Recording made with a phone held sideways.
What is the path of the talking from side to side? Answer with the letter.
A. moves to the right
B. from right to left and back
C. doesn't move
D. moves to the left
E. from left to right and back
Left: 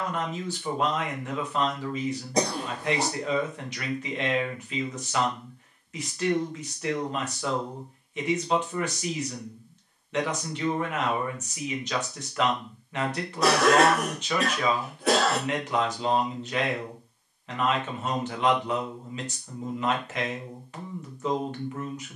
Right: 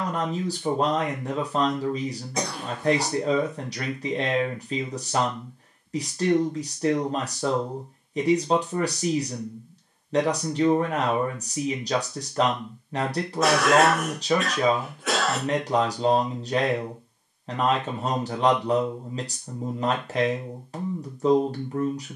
C.